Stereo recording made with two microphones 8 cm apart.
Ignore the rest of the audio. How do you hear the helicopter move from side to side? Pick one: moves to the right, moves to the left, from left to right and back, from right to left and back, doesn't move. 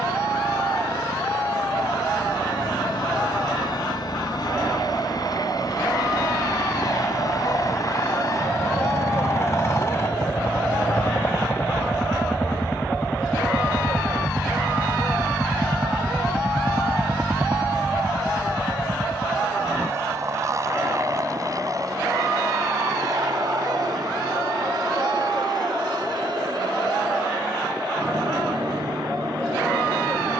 moves to the right.